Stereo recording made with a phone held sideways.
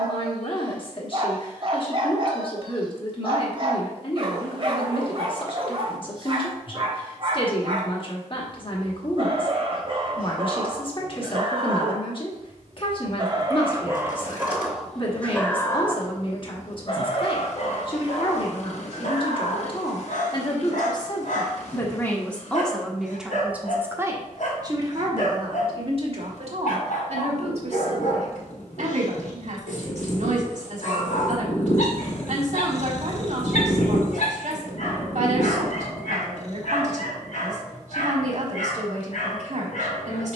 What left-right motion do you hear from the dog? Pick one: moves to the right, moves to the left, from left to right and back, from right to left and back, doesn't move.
moves to the left.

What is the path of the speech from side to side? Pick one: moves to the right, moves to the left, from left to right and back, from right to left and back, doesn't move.
moves to the right.